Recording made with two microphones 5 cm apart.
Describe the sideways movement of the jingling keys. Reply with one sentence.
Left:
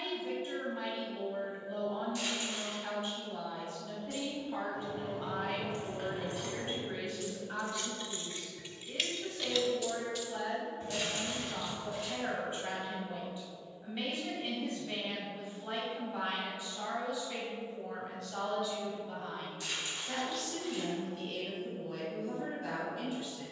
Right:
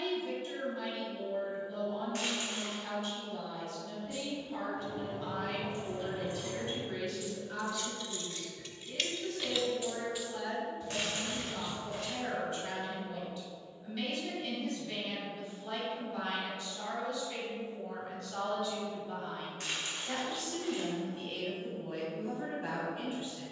In this clip you hear the jingling keys move from left to right and back again.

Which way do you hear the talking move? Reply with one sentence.
You can hear the talking move from left to right.